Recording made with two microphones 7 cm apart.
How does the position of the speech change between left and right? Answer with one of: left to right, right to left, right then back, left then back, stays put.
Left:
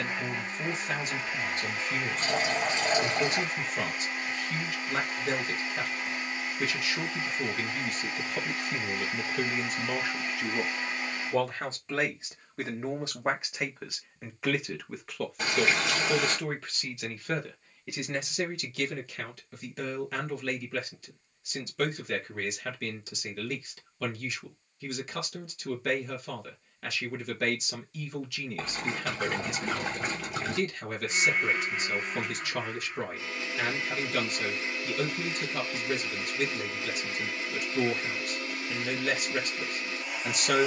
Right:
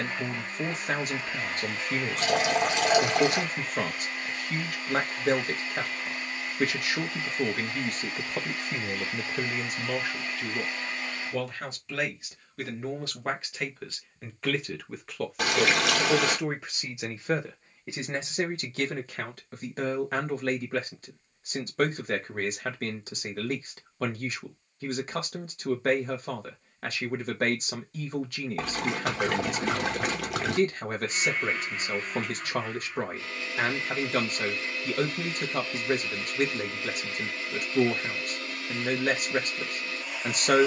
left then back.